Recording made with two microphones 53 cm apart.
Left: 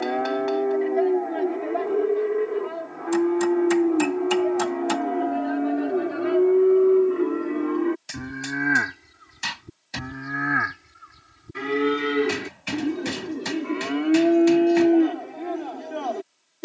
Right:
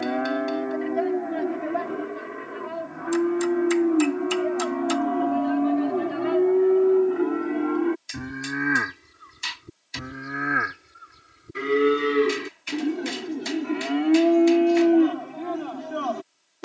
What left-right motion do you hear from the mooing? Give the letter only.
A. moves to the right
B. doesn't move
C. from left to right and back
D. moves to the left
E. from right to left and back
E.